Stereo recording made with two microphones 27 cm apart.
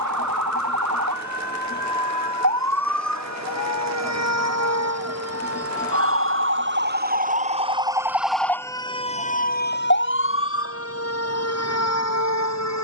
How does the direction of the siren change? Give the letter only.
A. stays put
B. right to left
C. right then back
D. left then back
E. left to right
B.